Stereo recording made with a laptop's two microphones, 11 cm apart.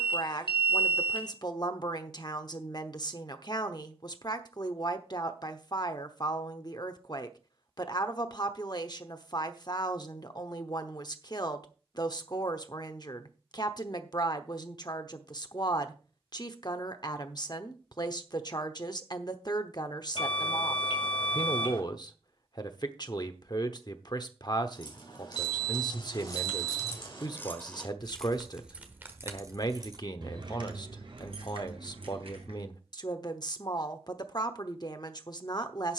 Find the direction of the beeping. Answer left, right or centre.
left.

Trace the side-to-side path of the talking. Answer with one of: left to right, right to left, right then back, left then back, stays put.
stays put.